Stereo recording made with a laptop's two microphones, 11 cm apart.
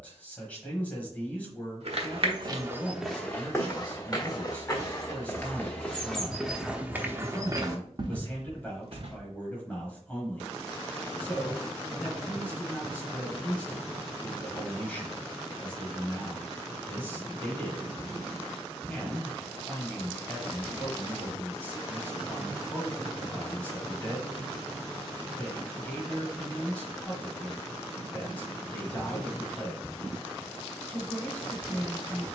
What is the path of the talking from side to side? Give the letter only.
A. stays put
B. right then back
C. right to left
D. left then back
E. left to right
A.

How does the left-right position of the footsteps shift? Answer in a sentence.
You can hear the footsteps go left and come back.